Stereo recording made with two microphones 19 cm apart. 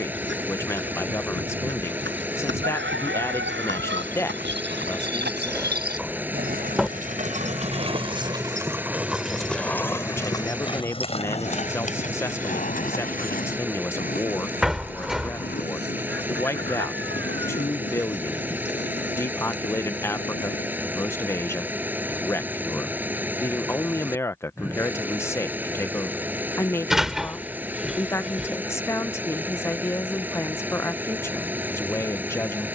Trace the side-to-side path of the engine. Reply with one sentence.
In this clip you hear the engine stay put.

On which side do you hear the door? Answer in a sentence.
You can hear the door in the centre.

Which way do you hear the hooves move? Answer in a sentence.
You can hear the hooves move to the left.